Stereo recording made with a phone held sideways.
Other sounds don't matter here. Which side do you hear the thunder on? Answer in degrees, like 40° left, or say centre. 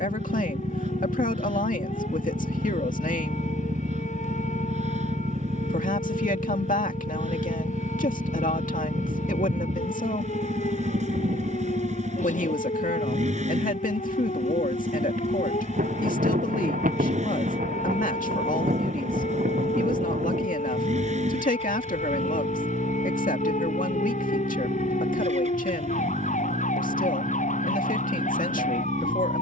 70° right.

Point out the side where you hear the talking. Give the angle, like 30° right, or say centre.
70° left.